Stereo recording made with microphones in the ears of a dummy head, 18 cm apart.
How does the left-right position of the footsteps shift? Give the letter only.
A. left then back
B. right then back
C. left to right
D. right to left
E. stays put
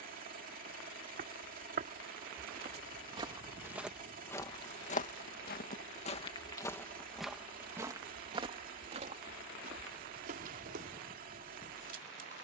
A.